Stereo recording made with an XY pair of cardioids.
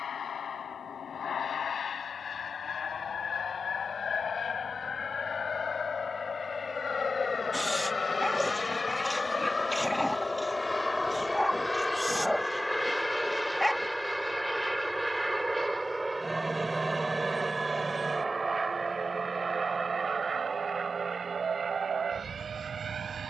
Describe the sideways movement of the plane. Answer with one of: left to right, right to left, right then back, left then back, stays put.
left to right.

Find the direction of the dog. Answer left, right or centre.
centre.